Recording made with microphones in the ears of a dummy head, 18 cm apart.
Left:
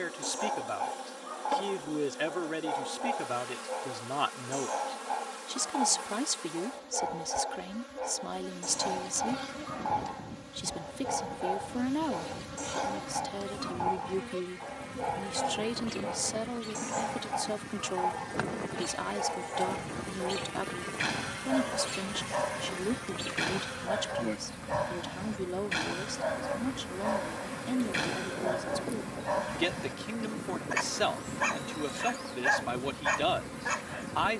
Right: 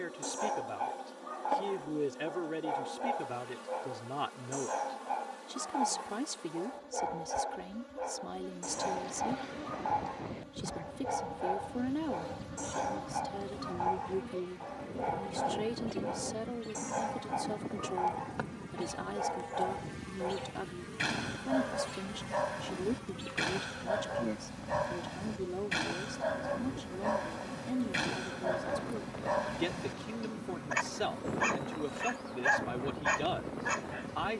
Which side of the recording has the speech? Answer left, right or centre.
left.